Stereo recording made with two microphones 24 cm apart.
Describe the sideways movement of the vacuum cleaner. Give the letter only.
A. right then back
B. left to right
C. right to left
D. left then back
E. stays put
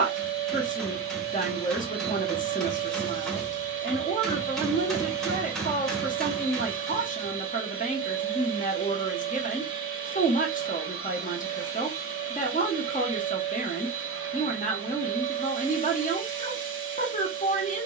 E.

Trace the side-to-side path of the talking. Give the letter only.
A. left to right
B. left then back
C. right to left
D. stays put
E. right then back
D.